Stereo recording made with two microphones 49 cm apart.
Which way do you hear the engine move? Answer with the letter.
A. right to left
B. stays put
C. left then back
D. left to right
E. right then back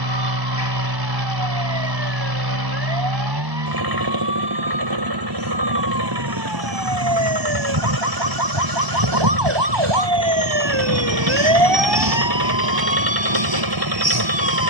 B.